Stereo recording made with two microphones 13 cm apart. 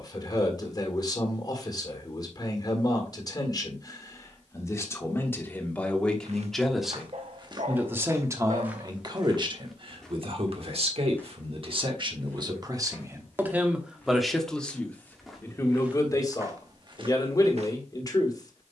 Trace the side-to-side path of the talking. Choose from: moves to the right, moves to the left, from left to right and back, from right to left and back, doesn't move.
from left to right and back.